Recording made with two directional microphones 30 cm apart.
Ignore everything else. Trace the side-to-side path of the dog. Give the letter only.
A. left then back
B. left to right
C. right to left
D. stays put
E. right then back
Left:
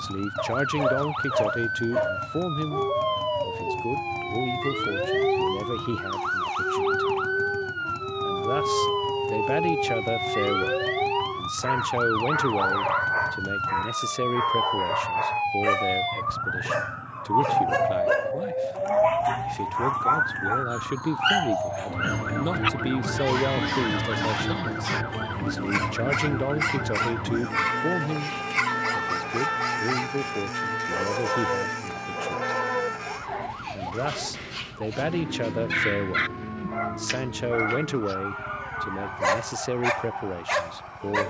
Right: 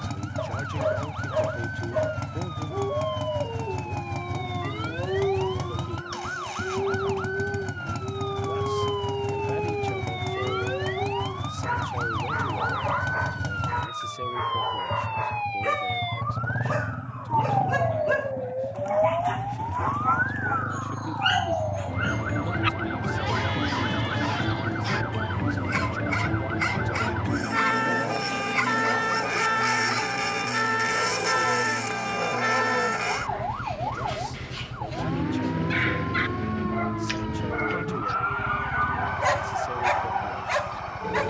D.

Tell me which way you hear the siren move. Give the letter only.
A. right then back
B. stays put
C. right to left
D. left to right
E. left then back
D.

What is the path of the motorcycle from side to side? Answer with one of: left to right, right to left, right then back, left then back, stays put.
stays put.